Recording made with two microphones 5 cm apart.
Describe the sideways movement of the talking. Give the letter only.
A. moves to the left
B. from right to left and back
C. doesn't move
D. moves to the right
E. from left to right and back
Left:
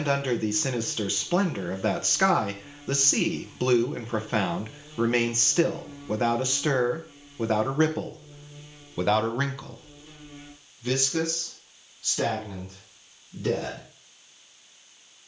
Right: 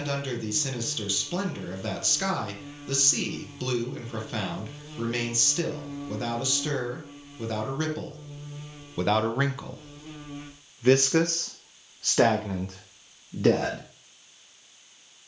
D.